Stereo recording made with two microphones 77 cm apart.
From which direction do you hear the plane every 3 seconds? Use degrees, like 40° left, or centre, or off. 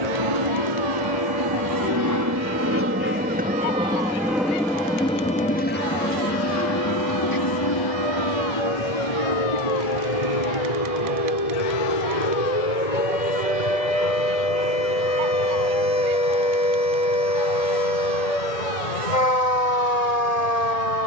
30° right, centre, 30° left, 40° left, 50° left, 60° left, 70° left.